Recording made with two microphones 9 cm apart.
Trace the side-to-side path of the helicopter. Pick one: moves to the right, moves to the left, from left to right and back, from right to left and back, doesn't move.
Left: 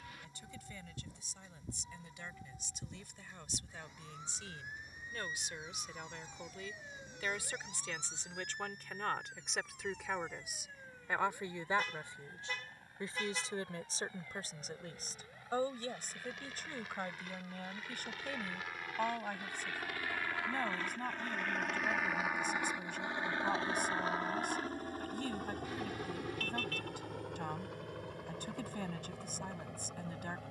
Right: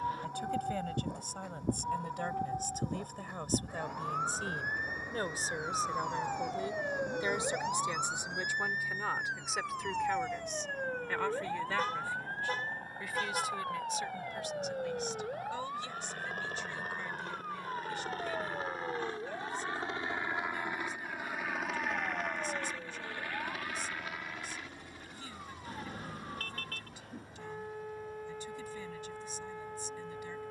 moves to the left.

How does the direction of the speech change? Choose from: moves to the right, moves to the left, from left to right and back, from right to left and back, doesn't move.
moves to the left.